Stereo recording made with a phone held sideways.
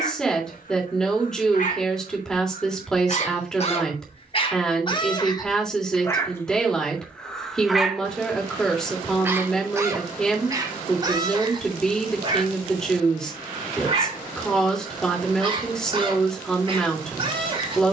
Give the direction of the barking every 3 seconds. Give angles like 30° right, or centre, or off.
60° left, 40° left, 10° left, 20° right, 40° right, 40° right.